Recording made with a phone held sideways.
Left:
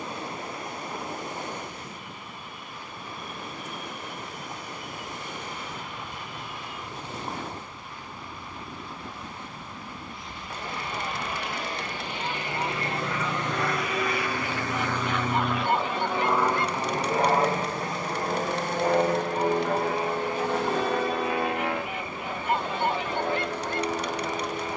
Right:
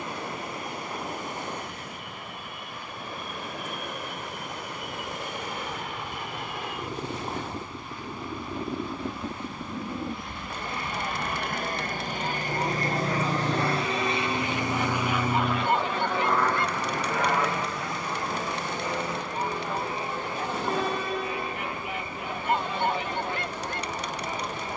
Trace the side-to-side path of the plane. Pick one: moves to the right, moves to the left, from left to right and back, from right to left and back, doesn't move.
moves to the left.